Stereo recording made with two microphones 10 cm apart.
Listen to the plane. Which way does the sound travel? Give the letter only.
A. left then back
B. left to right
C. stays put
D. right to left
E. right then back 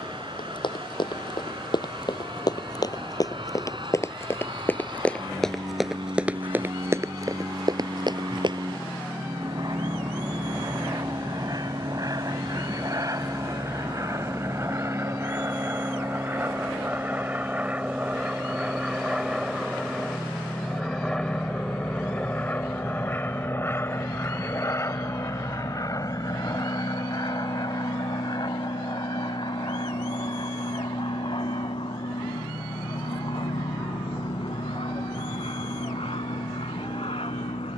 D.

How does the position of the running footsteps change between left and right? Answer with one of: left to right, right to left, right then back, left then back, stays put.
left to right.